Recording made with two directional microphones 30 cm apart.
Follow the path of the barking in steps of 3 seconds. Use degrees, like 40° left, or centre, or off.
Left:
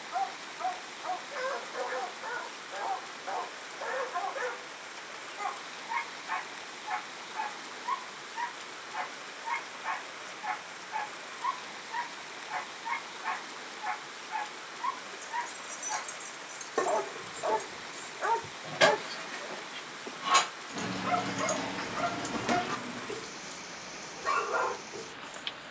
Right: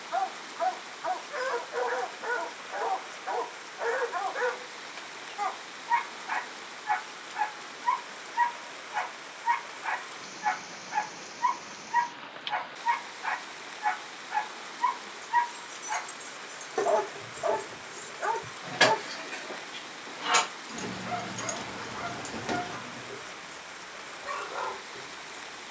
30° right, 30° right, 30° right, 30° right, 30° right, 20° right, 20° left, 50° left, 60° left.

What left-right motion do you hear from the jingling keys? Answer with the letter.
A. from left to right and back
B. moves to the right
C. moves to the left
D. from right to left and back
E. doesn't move
A.